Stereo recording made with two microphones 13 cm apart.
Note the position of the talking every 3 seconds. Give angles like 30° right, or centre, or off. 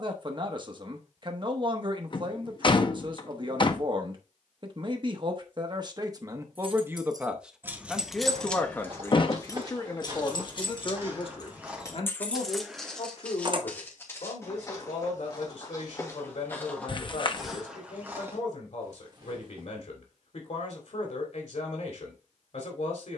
40° right, 40° right, 10° right, 40° left, 60° left, 60° left, 60° left, 60° left.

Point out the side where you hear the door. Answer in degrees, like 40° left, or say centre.
40° left.